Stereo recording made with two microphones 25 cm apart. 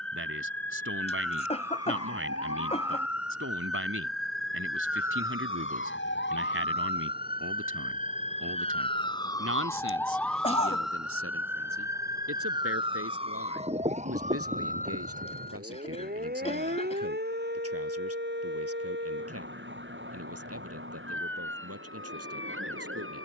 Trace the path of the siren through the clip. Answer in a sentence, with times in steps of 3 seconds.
You can hear the siren on the left from 0 s, in the centre from 9 s and on the right from 12 s.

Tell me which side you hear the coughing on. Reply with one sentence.
In this clip you hear the coughing on the left.